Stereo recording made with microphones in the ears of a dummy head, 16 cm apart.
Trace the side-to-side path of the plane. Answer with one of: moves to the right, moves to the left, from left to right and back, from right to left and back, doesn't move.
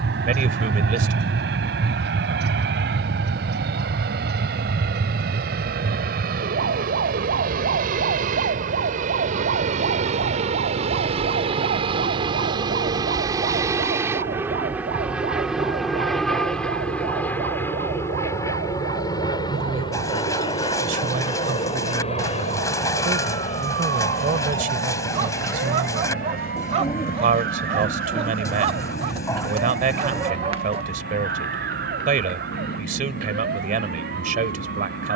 moves to the left.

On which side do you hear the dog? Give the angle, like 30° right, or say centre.
30° right.